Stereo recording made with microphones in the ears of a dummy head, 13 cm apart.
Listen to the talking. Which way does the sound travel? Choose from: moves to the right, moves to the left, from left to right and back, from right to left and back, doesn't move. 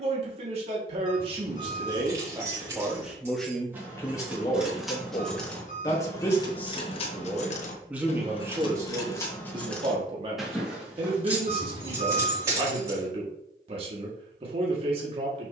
from right to left and back.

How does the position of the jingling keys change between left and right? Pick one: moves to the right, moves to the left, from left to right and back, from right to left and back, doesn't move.
from right to left and back.